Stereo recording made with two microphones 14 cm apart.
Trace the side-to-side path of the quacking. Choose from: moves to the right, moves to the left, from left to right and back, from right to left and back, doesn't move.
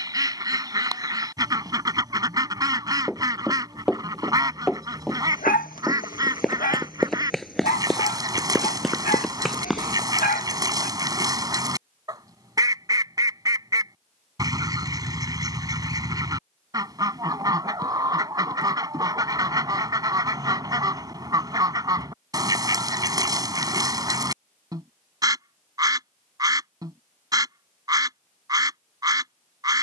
doesn't move.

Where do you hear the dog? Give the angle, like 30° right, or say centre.
80° left.